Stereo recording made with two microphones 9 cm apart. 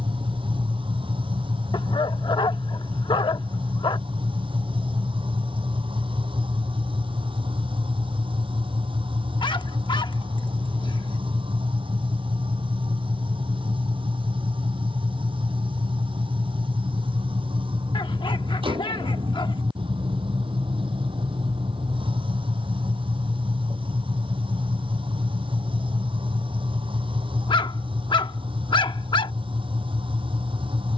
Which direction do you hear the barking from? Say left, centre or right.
left.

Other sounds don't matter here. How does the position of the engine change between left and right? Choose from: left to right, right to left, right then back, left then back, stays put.
stays put.